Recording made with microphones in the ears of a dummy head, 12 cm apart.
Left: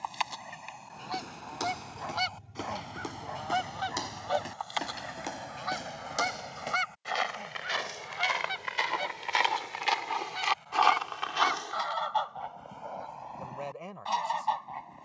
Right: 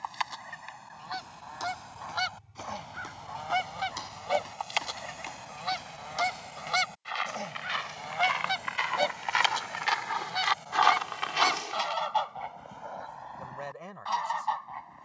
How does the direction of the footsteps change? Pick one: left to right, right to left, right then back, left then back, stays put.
left to right.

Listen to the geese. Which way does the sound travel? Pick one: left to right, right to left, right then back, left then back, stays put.
right then back.